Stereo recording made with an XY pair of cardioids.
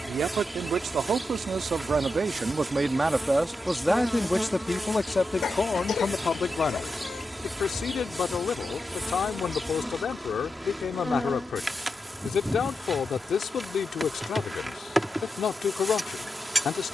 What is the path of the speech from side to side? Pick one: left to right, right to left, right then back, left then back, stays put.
right to left.